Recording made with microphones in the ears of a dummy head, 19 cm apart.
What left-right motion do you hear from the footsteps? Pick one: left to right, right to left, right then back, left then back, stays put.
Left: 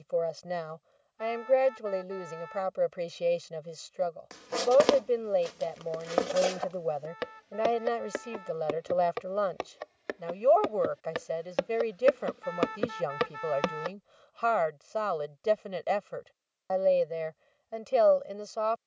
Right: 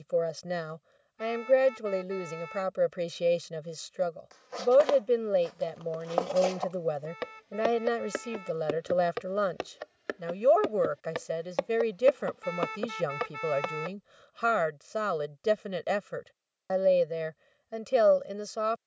right then back.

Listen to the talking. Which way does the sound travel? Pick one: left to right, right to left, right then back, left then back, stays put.
stays put.